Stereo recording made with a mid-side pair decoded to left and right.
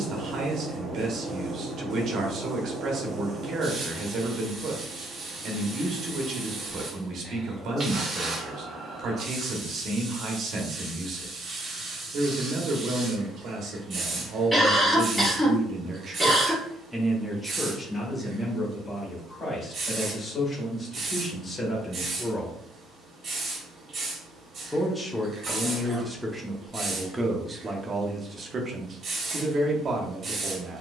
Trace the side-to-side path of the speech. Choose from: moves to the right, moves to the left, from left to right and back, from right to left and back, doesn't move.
from right to left and back.